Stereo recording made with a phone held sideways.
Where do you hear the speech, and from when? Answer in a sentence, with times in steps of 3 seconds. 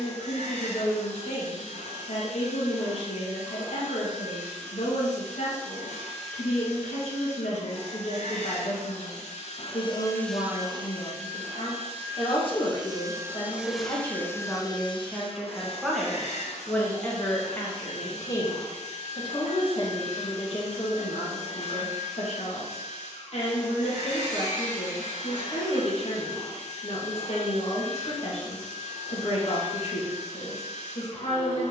You can hear the speech on the left from 0 s, in the centre from 15 s and on the left from 18 s.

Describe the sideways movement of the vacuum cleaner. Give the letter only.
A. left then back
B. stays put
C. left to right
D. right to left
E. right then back
E.